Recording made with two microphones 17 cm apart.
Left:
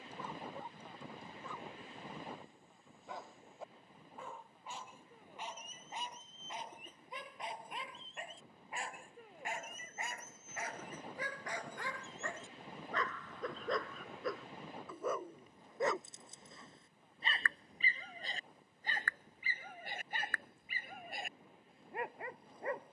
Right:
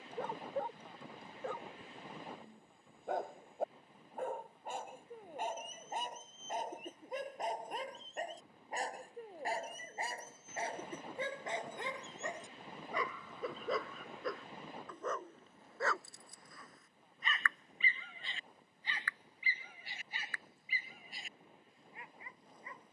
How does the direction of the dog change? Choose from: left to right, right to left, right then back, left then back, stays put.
right to left.